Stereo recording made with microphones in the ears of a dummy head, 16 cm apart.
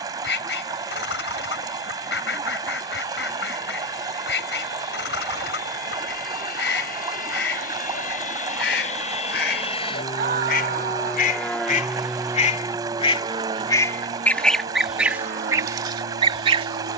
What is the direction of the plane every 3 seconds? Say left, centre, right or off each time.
left, left, left, left, right, right.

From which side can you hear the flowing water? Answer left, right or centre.
right.